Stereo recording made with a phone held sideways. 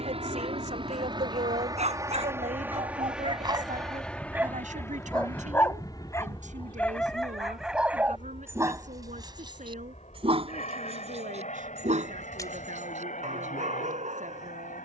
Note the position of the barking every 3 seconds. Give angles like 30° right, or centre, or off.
50° right, 10° right, centre, 40° right, 60° right.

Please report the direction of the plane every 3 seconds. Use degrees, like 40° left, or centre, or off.
30° right, 10° left, 40° left, 50° left, 60° left.